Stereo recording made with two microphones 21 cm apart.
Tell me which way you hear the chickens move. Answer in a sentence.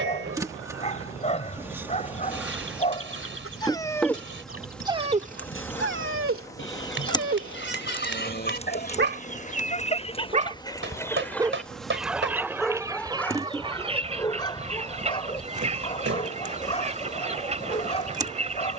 You can hear the chickens travel towards the right.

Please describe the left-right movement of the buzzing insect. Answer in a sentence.
In this clip you hear the buzzing insect move from right to left and back again.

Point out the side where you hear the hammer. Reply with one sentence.
You can hear the hammer on the right.